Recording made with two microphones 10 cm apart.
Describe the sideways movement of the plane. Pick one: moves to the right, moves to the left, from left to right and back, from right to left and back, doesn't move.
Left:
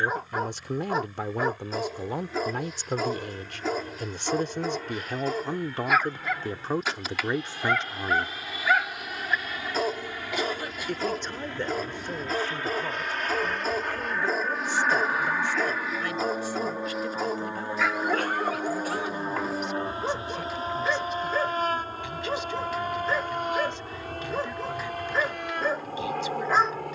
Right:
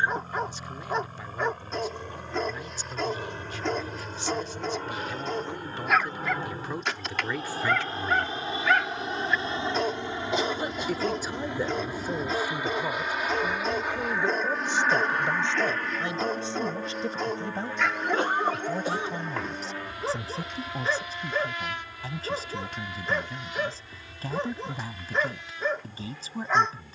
moves to the left.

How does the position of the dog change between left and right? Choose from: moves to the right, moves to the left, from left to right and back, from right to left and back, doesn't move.
doesn't move.